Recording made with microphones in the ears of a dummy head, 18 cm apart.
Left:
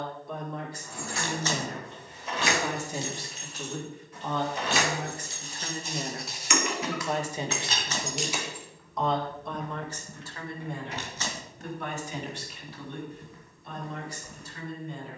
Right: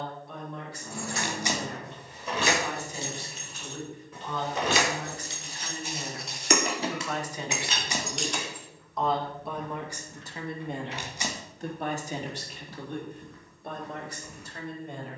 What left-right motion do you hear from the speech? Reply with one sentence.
In this clip you hear the speech move to the right.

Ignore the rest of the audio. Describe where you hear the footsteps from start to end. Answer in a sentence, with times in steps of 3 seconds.
In this clip you hear the footsteps not at all from 0 s, in the centre from 3 s, on the left from 6 s and in the centre from 12 s.